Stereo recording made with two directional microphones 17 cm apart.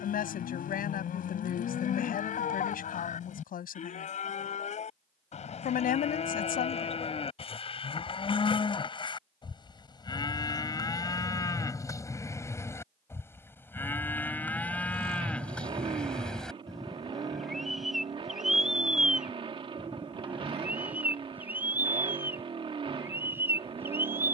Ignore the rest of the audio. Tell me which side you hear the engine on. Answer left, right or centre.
right.